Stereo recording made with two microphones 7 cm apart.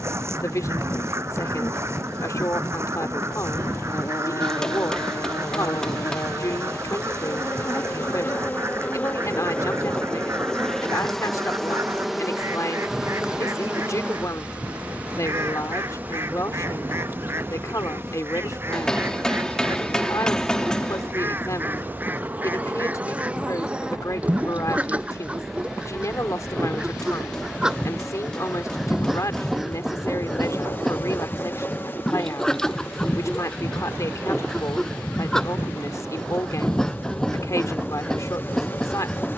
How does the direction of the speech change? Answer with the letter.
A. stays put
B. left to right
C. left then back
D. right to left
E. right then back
A.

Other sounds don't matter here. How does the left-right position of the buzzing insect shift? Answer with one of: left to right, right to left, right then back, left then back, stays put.
right then back.